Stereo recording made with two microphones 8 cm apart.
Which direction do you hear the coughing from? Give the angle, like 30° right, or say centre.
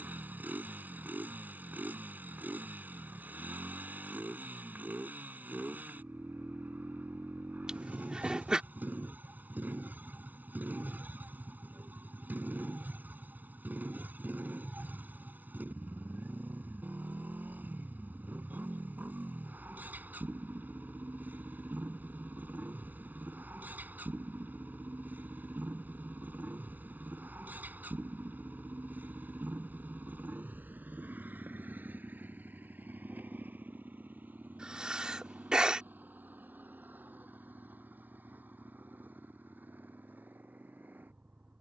10° right.